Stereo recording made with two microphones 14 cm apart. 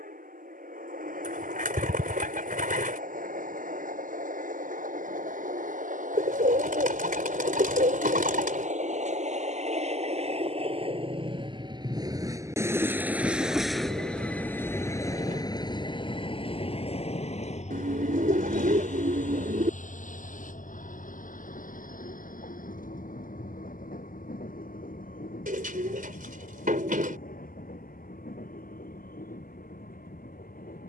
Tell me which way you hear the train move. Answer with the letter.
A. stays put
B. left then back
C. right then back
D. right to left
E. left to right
D.